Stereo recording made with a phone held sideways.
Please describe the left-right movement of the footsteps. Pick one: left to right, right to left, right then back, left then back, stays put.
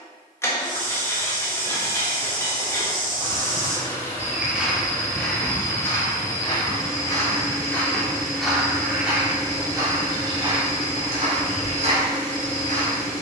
left then back.